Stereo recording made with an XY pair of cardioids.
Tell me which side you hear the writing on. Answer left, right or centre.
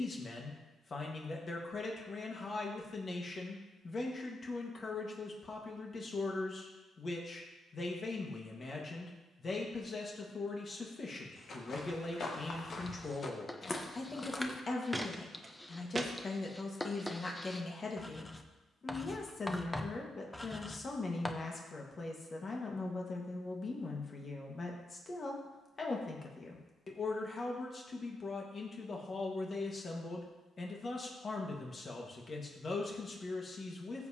centre.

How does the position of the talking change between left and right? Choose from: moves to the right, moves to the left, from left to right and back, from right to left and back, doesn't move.
doesn't move.